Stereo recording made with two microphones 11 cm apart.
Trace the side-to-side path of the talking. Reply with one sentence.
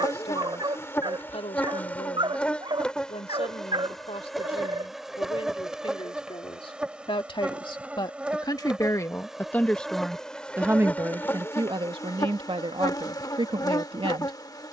In this clip you hear the talking move from left to right.